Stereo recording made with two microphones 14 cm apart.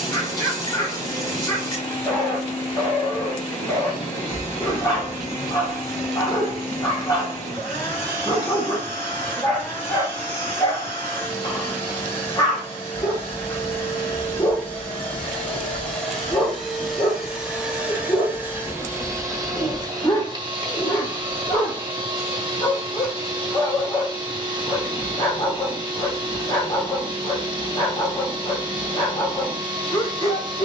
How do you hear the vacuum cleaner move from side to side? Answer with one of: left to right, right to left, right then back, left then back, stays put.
left to right.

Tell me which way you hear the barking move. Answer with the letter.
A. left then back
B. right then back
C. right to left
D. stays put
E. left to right
D.